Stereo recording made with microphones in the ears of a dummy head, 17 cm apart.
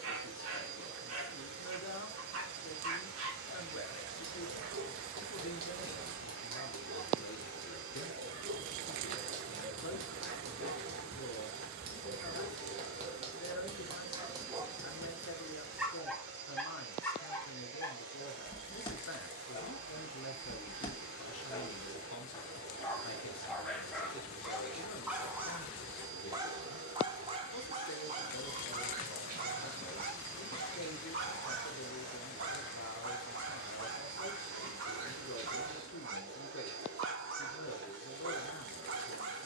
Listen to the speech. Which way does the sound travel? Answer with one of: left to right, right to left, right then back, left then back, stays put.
stays put.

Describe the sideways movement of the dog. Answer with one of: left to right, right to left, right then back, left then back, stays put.
left then back.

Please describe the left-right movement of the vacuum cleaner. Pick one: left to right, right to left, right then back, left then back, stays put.
stays put.